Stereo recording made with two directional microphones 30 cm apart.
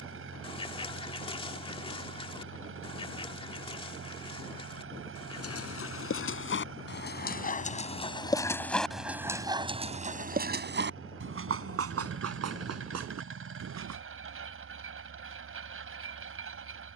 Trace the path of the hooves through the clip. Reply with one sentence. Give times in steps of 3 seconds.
You can hear the hooves not at all from 0 s, on the left from 3 s, on the right from 9 s and not at all from 15 s.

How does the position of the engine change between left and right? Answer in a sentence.
In this clip you hear the engine stay put.